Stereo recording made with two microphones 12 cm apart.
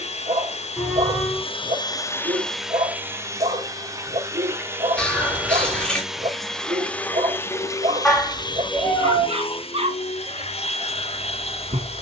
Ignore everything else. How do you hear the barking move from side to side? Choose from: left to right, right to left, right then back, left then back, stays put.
stays put.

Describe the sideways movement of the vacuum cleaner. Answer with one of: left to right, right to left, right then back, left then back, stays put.
right then back.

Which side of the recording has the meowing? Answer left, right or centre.
centre.